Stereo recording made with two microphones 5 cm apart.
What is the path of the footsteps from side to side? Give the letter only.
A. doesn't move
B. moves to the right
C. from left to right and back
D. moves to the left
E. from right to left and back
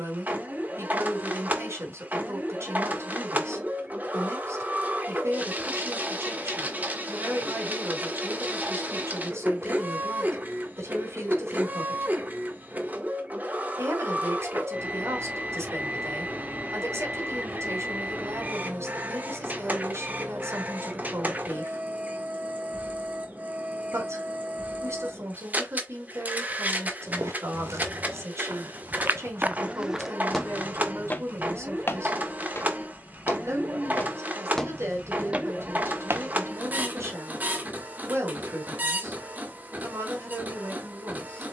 E.